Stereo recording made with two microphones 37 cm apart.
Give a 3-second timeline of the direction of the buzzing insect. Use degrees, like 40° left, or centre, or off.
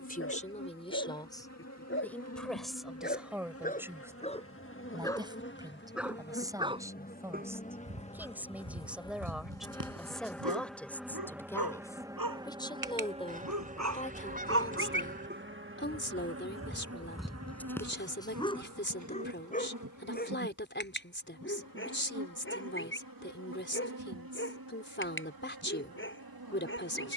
40° left, 30° left, 20° left, centre, 20° right, 40° right, 50° right, 60° right, 70° right.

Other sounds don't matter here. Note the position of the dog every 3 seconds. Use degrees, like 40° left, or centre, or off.
30° left, 10° left, 30° right, 60° right, 50° right, 10° right, 20° left, 30° left, 30° left.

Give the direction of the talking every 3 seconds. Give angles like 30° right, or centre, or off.
10° left, 10° right, 10° right, centre, 20° left, 30° left, 30° left, 30° left, 30° left.